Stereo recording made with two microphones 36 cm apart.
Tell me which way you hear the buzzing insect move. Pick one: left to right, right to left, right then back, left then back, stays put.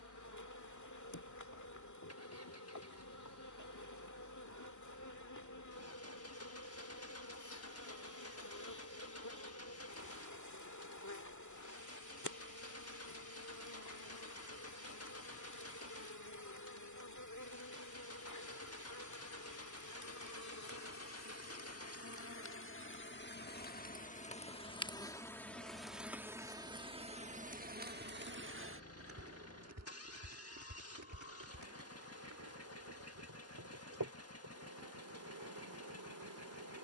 left to right.